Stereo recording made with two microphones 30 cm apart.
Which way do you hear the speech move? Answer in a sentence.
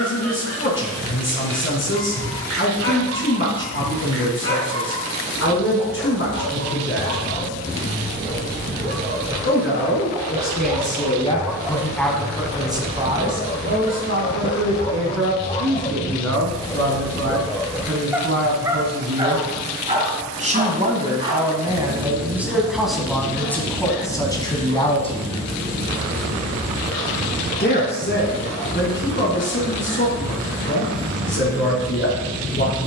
You can hear the speech go right and come back.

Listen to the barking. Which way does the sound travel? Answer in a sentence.
You can hear the barking move from right to left and back again.